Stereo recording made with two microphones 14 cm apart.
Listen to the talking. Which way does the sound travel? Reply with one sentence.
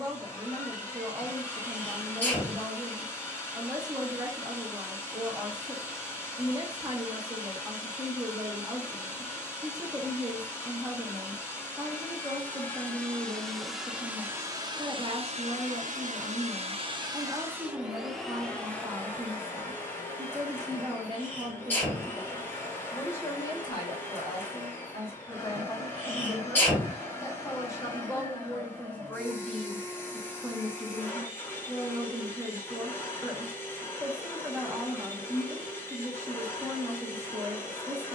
You can hear the talking move from right to left and back again.